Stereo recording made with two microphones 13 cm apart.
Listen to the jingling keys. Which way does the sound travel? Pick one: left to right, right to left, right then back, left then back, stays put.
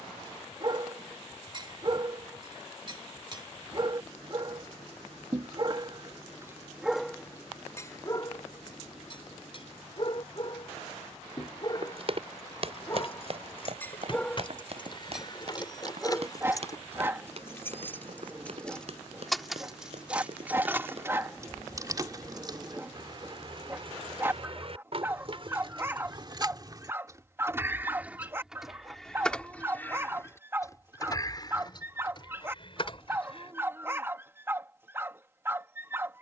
right then back.